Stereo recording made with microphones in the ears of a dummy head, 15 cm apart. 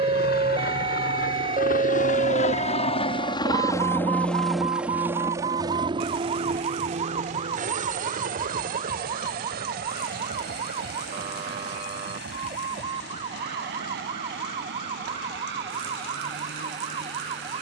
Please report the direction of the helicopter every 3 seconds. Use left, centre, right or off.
left, centre, right, right, right, right.